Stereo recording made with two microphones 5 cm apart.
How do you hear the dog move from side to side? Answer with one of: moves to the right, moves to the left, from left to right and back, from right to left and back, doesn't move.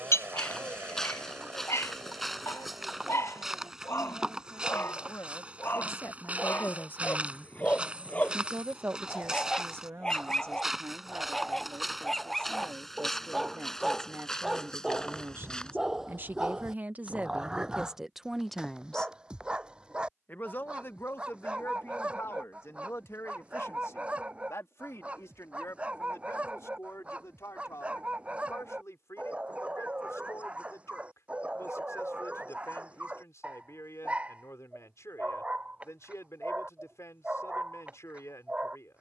moves to the right.